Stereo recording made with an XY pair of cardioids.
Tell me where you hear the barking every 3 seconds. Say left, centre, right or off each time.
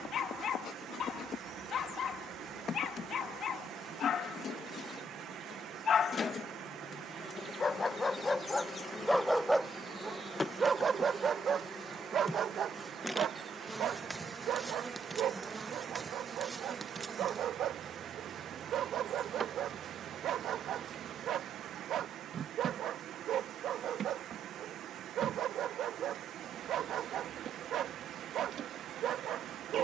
left, left, left, right, right, right, right, right, right, right.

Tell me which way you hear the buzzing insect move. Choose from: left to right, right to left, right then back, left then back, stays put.
left to right.